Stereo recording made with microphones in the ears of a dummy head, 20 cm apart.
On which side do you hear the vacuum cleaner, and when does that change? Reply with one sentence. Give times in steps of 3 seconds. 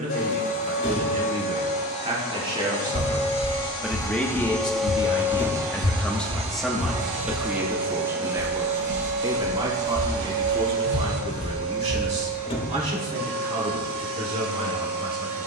You can hear the vacuum cleaner on the left from 0 s, in the centre from 3 s and on the right from 6 s.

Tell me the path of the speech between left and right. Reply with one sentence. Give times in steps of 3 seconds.
In this clip you hear the speech on the right from 0 s, in the centre from 3 s and on the right from 9 s.